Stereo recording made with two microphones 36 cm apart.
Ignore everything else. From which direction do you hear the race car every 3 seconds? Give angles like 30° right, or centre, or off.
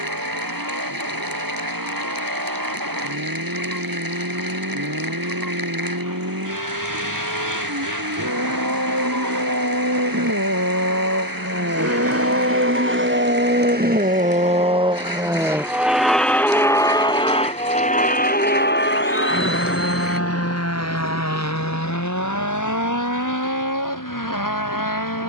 80° right, 70° right, 70° right, 50° right, 30° right, centre, 30° left, 50° left, 60° left.